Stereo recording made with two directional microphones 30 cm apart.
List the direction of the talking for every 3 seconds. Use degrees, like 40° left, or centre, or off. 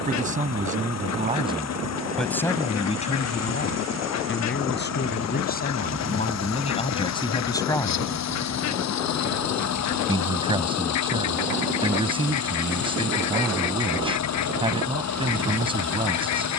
10° right, 30° left, 20° left, 20° right, 20° right, 20° right.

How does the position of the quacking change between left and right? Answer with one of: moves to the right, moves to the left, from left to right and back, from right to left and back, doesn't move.
doesn't move.